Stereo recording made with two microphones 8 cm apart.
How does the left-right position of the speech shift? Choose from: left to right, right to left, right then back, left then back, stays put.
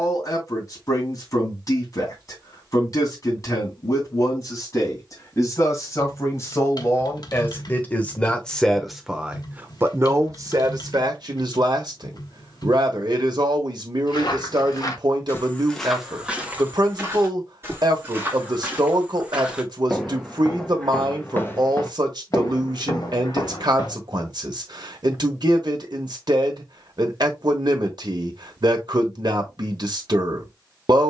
left to right.